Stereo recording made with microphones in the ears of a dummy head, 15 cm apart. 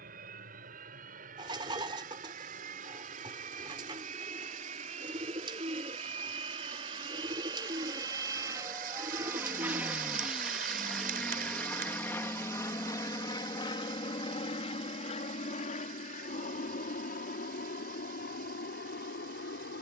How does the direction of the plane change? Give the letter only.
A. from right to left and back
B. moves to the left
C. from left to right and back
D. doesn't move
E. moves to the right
B.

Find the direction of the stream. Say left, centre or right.
right.